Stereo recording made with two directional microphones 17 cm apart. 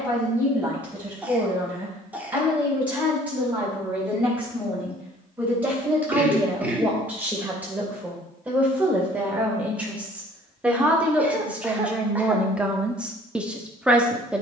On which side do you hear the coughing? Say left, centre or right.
centre.